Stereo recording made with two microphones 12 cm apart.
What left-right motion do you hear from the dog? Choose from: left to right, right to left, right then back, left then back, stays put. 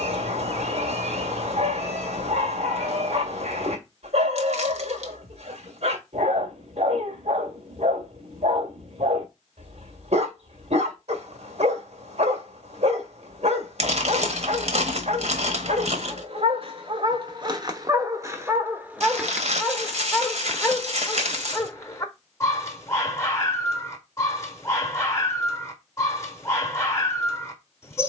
right to left.